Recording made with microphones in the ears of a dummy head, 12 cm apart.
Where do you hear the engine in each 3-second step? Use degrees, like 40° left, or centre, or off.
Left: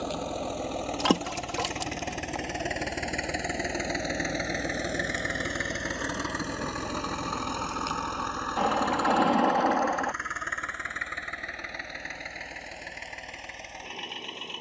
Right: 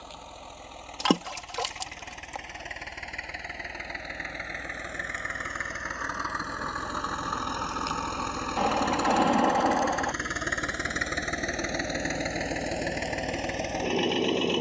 60° left, 50° left, 10° left, 40° right, 60° right.